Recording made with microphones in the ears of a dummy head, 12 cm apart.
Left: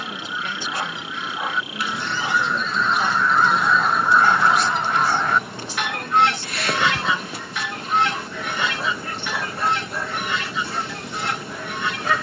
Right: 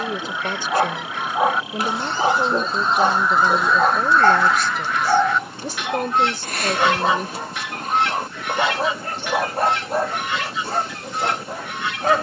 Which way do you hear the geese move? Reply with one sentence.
In this clip you hear the geese go from the right side to the left.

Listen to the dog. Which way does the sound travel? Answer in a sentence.
You can hear the dog stay in one place.